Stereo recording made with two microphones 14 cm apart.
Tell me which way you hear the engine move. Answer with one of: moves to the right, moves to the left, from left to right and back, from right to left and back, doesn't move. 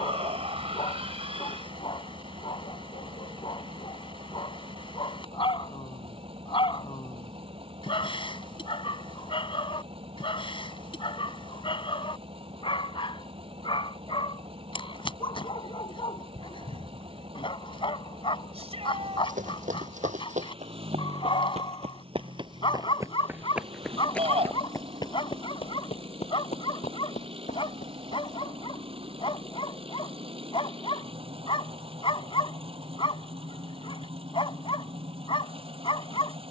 doesn't move.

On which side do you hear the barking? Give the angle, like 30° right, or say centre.
40° left.